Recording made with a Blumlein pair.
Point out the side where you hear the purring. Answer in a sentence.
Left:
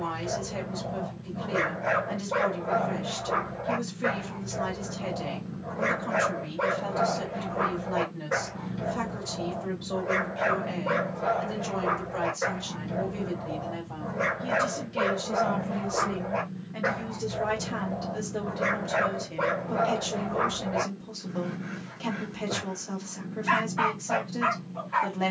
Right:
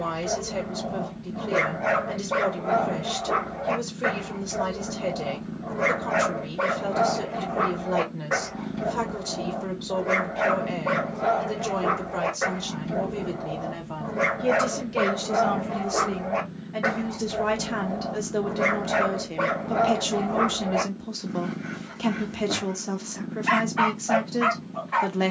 In this clip you hear the purring on the right.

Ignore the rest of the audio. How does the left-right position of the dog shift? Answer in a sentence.
In this clip you hear the dog stay in one place.